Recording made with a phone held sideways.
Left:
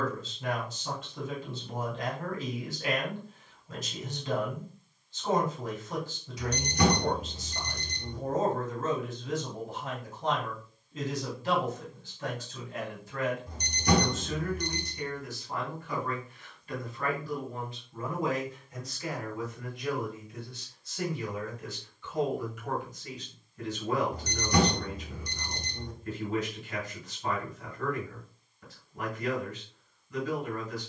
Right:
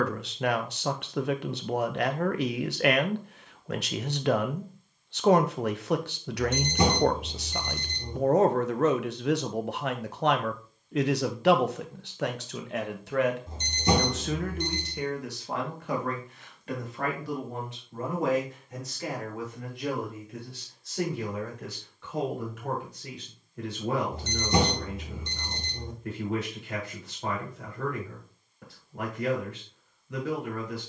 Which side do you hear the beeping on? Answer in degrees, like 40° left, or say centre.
20° right.